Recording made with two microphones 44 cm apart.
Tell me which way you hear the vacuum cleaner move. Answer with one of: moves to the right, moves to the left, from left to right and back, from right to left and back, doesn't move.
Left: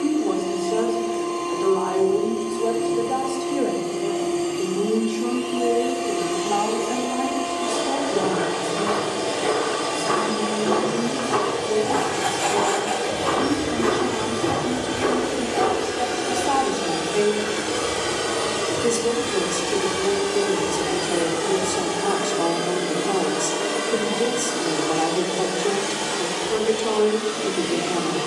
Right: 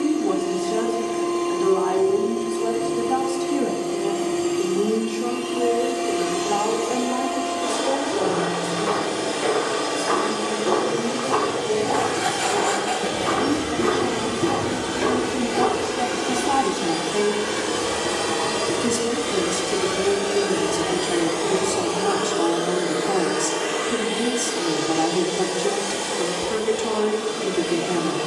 moves to the left.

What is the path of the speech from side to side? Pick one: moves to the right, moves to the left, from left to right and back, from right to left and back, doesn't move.
from right to left and back.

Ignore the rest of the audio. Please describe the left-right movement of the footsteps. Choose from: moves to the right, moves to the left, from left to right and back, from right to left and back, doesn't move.
moves to the right.